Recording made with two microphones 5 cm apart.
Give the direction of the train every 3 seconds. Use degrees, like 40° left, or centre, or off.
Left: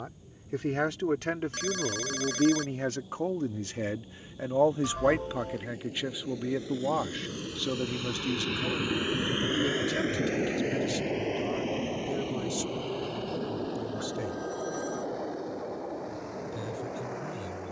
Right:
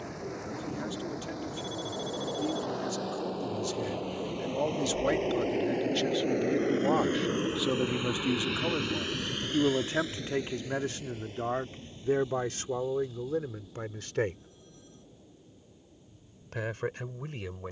80° right, 70° right, 30° right, 50° left, 70° left, 70° left.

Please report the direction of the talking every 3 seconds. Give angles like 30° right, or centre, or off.
60° left, 30° left, 10° right, 40° right, 50° right, 60° right.